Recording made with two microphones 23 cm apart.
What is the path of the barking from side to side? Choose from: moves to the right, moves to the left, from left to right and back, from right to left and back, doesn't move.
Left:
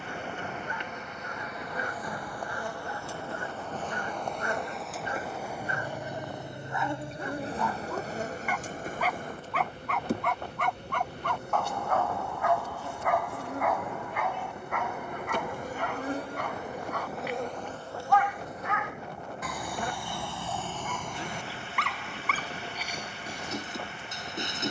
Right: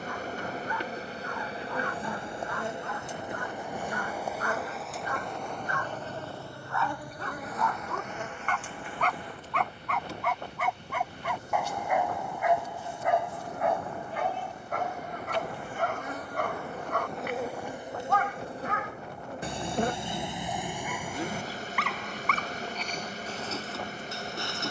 from left to right and back.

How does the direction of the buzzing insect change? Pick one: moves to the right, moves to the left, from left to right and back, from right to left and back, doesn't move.
from right to left and back.